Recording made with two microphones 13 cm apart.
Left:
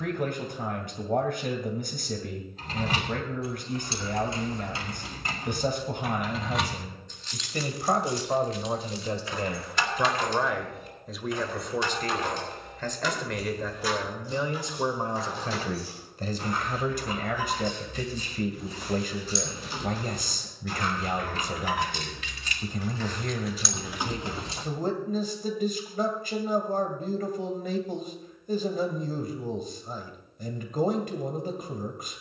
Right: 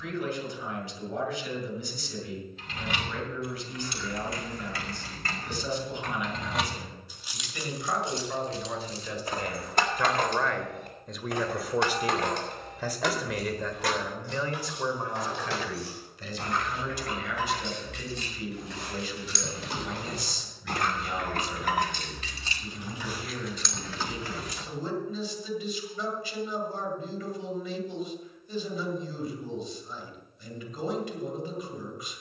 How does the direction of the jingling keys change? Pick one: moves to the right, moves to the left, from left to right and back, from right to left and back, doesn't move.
from left to right and back.